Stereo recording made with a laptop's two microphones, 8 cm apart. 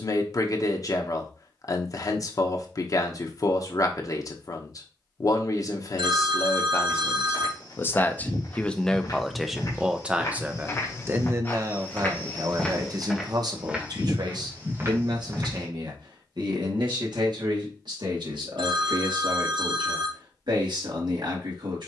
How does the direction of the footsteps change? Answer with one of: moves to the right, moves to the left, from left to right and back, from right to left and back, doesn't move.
moves to the right.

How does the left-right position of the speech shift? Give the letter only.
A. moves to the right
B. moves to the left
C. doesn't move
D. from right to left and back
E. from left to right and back
A.